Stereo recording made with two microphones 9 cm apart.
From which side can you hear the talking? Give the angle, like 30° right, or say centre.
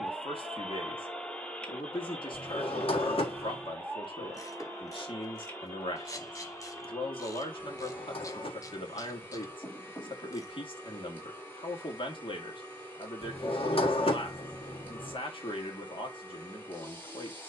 60° left.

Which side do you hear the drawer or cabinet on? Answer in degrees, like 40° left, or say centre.
70° left.